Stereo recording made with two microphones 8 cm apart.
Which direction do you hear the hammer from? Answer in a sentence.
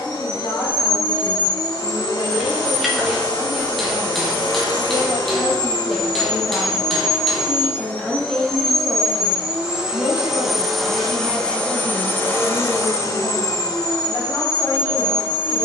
In this clip you hear the hammer in the centre.